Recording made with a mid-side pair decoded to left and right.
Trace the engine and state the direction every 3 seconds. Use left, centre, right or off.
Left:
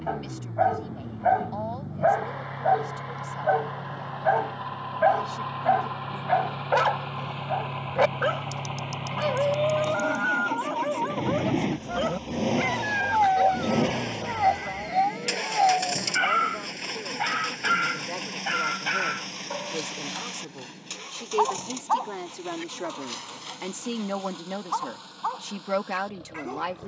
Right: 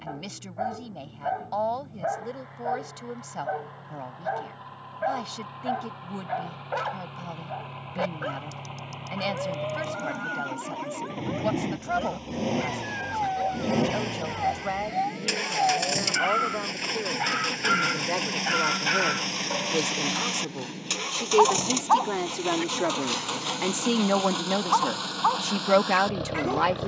left, left, left, left, centre, centre, right, right, right.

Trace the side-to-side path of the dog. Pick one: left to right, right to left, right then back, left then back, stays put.
left to right.